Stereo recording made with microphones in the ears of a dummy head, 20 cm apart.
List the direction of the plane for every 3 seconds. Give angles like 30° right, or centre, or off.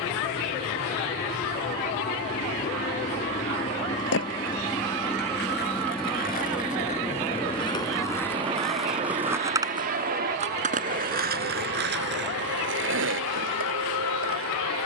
40° left, 20° left, 10° right, 40° right, 60° right.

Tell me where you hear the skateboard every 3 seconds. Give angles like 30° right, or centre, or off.
off, 50° left, 20° left, 30° right, 60° right.